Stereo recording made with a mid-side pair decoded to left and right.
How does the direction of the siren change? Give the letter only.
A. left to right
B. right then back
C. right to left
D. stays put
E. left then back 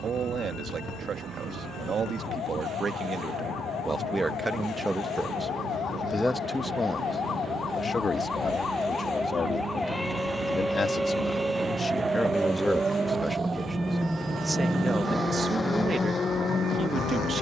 A.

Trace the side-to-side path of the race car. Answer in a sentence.
In this clip you hear the race car go from the right side to the left.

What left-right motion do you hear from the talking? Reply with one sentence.
You can hear the talking go left and come back.